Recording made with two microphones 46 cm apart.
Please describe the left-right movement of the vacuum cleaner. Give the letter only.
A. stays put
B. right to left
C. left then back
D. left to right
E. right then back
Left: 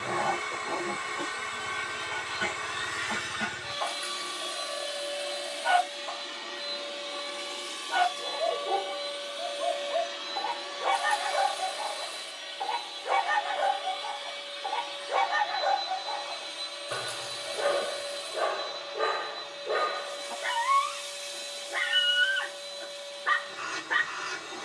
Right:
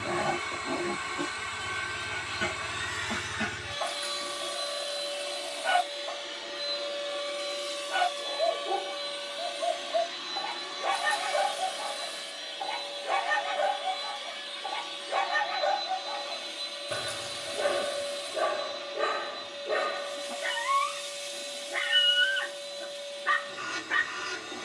D.